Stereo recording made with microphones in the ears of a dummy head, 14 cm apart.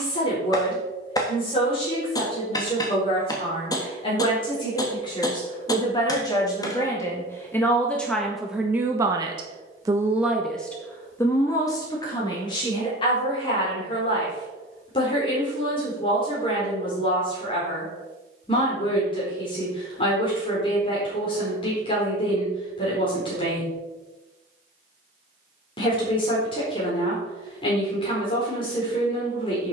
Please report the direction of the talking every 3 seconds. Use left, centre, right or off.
left, left, centre, centre, left, left, left, left, left, left.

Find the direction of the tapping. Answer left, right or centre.
left.